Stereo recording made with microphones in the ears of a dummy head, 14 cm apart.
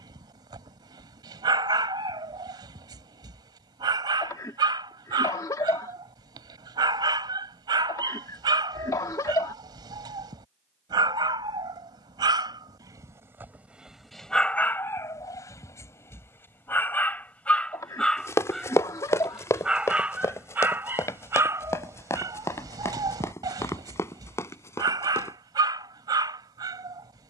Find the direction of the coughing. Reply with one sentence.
You can hear the coughing on the left.